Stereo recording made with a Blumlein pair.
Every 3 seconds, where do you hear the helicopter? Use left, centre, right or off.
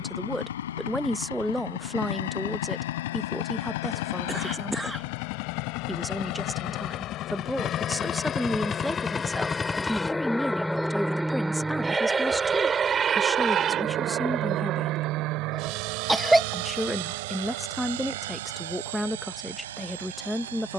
left, left, left, centre, right, right, right.